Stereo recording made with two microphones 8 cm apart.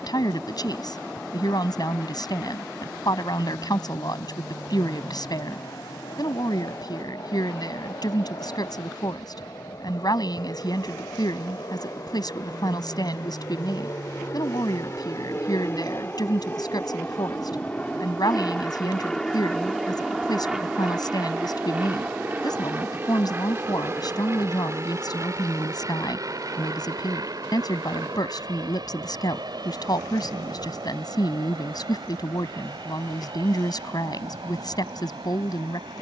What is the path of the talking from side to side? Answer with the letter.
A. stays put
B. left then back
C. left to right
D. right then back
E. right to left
A.